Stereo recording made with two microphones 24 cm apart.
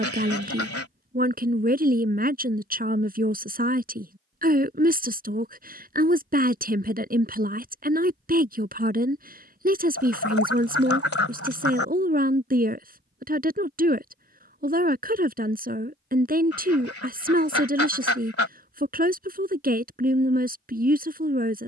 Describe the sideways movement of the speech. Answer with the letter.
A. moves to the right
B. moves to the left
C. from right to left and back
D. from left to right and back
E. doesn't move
E.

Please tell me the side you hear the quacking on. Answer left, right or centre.
left.